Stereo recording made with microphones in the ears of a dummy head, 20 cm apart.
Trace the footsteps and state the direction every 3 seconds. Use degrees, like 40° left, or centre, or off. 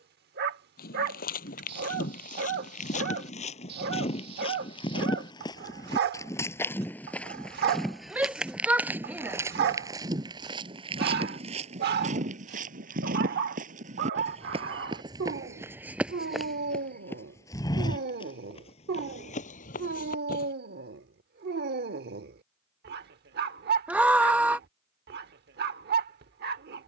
40° left, 20° left, centre, 20° right, 30° right, centre, 30° left, off, off.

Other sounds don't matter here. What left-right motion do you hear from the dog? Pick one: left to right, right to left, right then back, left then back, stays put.
stays put.